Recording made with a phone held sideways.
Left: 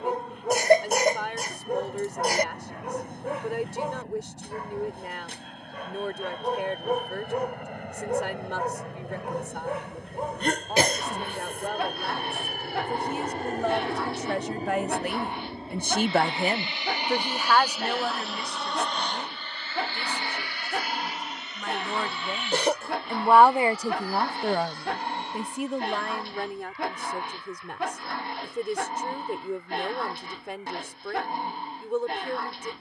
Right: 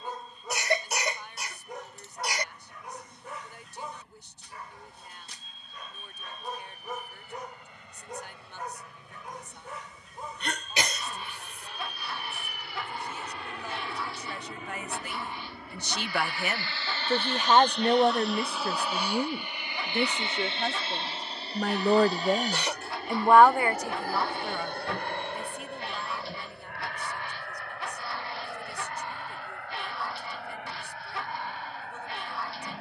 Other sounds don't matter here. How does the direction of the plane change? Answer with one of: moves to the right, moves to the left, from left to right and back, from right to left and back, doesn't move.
moves to the right.